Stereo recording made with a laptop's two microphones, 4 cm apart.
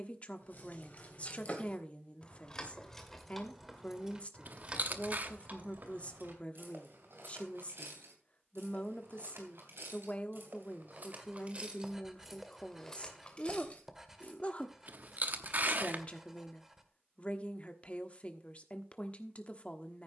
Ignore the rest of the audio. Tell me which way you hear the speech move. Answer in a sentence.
You can hear the speech stay put.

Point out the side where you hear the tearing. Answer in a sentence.
You can hear the tearing on the right.